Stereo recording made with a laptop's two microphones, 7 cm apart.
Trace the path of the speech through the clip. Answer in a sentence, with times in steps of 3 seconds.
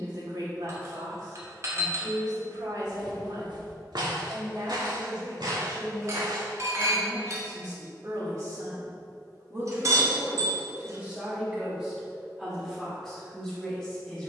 In this clip you hear the speech on the right from 0 s and in the centre from 12 s.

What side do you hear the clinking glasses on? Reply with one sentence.
In this clip you hear the clinking glasses on the right.